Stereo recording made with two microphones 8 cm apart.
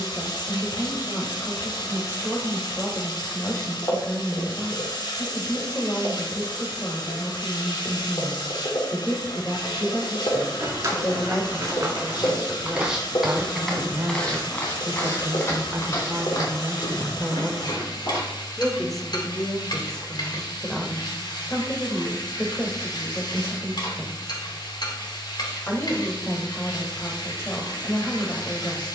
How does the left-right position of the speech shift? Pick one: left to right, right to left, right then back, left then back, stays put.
right then back.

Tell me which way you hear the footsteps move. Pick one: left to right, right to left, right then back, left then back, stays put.
right to left.